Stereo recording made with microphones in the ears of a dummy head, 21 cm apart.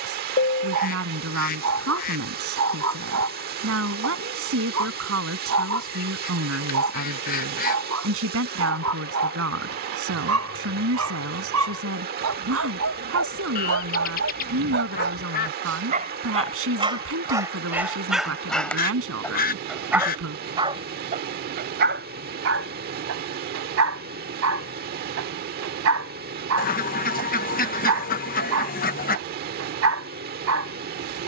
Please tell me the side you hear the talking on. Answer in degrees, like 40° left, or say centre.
60° right.